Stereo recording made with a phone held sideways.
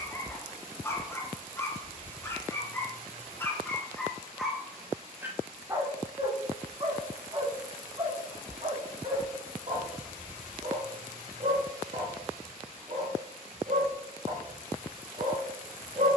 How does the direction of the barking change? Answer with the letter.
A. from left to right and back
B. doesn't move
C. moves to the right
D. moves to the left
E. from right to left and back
C.